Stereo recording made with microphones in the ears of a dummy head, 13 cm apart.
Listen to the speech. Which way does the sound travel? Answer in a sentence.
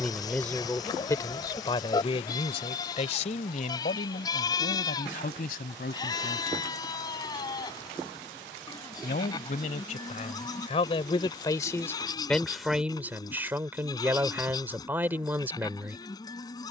You can hear the speech go left and come back.